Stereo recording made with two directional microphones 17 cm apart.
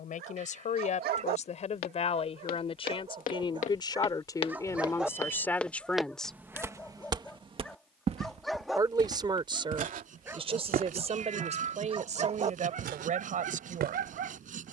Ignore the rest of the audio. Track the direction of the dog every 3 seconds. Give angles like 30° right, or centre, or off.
60° right, 20° right, centre, 20° right, 50° right.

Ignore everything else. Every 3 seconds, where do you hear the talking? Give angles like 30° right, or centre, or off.
40° left, 20° left, 10° right, 30° right, 50° right.